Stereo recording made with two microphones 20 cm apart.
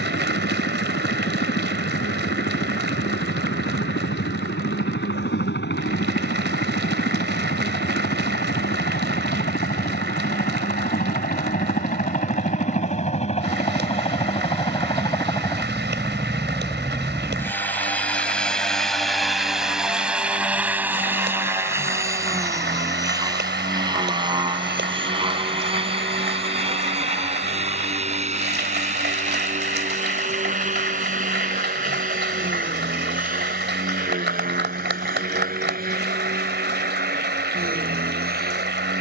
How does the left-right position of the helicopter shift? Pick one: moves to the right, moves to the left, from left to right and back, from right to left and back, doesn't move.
moves to the right.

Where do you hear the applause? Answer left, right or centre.
right.